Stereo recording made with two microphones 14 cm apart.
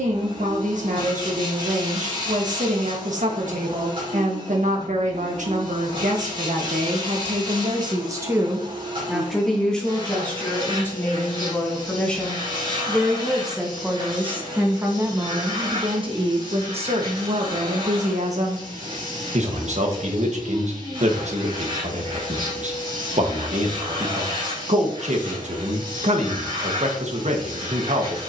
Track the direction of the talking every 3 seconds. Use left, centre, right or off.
right, right, right, centre, centre, right, right, right, right, right.